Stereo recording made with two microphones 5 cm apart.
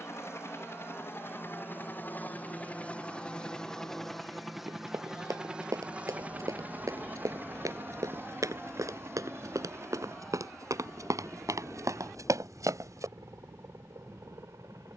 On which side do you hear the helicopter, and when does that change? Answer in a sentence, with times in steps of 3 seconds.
You can hear the helicopter on the left from 0 s, in the centre from 3 s and on the right from 6 s.